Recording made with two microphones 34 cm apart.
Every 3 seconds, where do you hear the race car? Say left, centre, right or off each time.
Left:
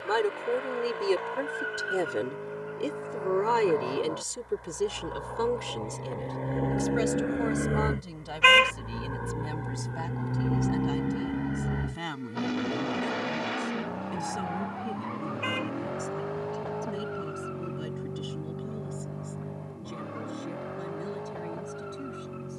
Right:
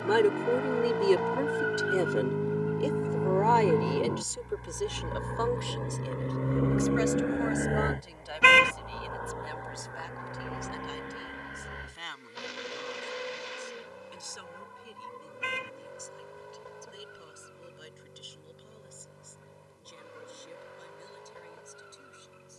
right, right, centre, left, left, left, left, left.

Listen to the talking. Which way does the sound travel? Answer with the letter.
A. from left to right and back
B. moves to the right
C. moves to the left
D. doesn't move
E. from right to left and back
C.